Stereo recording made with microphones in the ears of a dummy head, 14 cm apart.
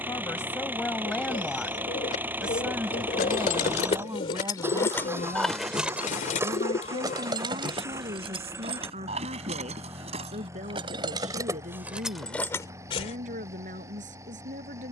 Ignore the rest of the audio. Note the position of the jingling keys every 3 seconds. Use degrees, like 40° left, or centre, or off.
off, 30° left, 30° right, 30° right, 20° left.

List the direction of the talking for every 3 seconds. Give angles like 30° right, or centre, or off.
10° left, 20° right, 40° right, 50° right, 50° right.